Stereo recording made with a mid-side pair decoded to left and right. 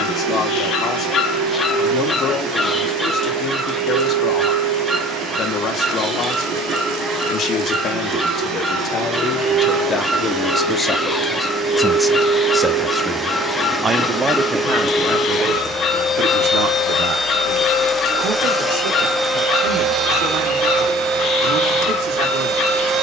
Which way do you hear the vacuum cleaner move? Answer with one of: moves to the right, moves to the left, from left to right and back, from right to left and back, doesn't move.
from right to left and back.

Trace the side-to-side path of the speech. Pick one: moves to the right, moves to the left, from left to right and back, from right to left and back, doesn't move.
moves to the right.